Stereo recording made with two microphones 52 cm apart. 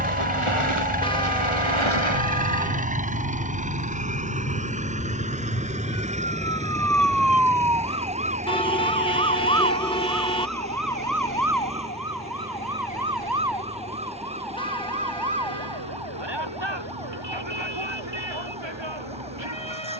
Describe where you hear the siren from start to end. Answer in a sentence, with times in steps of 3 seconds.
In this clip you hear the siren on the left from 0 s, in the centre from 6 s and on the right from 9 s.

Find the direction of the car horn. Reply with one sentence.
You can hear the car horn in the centre.